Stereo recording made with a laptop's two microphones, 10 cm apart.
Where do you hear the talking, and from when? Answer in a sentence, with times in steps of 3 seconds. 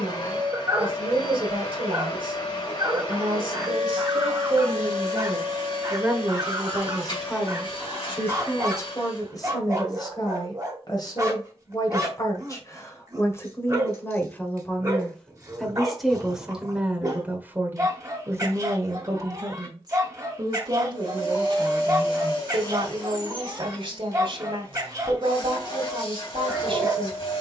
You can hear the talking on the right from 0 s, in the centre from 6 s, on the left from 9 s, in the centre from 15 s and on the right from 18 s.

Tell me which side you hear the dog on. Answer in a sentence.
In this clip you hear the dog on the right.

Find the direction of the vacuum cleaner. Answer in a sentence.
In this clip you hear the vacuum cleaner on the left.